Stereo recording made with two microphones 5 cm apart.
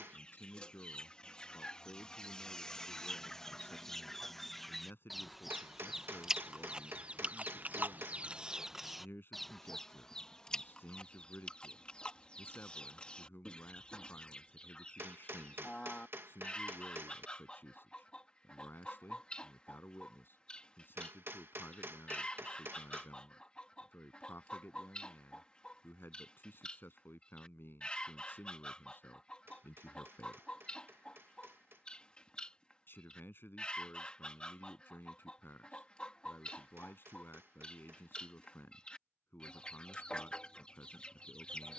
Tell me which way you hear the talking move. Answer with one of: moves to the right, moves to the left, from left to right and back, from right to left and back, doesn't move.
doesn't move.